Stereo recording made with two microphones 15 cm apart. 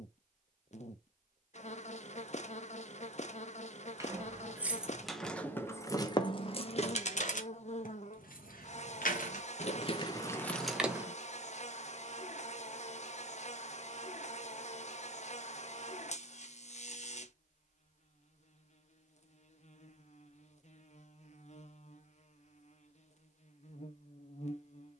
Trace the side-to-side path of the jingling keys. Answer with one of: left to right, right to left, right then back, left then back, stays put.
left then back.